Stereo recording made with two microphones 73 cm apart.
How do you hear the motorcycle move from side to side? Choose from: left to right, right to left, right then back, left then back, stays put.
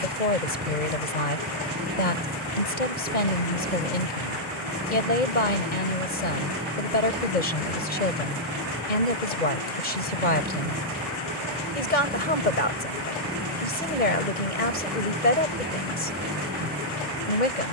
stays put.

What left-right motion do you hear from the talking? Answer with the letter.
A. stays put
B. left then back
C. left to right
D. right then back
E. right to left
A.